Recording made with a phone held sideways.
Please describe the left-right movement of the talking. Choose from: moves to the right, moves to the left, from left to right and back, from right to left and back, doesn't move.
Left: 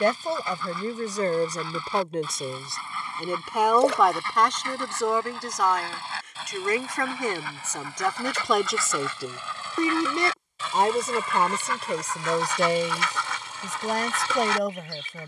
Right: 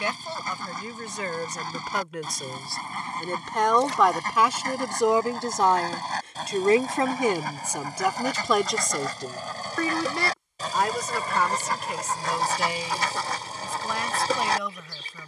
from left to right and back.